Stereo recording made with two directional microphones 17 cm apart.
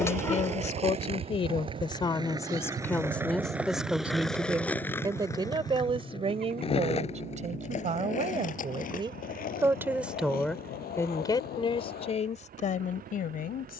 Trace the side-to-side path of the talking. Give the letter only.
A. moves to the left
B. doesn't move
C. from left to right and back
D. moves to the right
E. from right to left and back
C.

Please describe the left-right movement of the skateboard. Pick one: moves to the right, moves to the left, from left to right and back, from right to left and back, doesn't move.
moves to the left.